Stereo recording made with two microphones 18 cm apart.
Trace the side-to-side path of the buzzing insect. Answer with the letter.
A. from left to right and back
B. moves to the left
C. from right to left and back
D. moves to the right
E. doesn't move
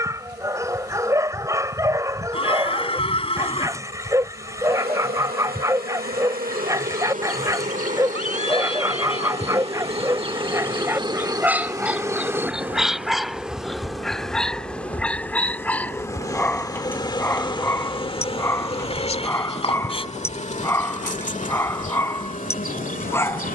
B.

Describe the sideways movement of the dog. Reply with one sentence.
You can hear the dog travel towards the left.